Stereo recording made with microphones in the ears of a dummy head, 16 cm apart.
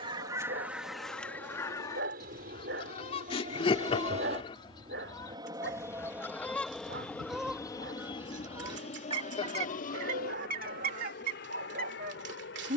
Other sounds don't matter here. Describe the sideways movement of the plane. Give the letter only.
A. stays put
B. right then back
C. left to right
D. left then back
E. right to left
E.